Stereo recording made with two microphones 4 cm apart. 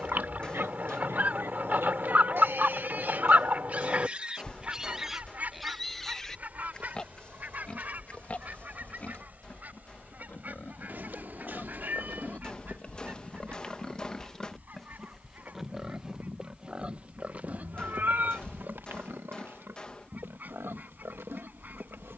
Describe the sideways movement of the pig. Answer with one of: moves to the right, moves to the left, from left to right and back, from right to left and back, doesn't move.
from right to left and back.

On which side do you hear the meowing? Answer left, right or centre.
right.